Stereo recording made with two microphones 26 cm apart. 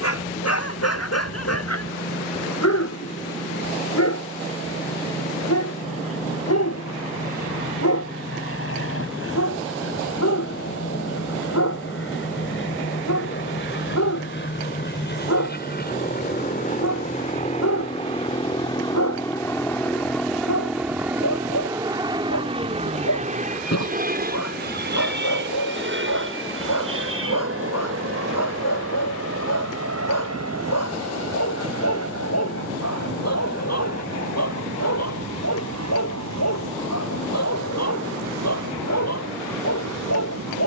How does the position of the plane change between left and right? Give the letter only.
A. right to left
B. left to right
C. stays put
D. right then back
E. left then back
B.